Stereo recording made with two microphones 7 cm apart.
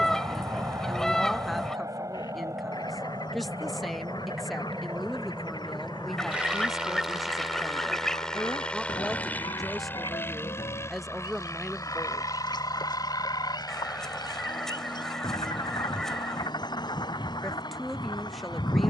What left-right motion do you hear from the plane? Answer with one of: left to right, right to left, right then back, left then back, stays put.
right to left.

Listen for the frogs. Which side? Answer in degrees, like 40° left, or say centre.
70° left.